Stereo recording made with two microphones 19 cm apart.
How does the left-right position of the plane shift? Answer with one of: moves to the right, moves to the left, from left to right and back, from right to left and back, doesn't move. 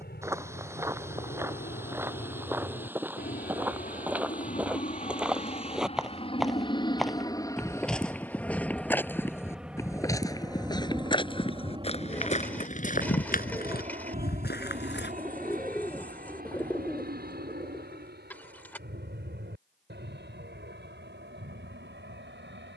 moves to the right.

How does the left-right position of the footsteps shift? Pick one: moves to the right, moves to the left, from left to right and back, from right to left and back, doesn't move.
moves to the left.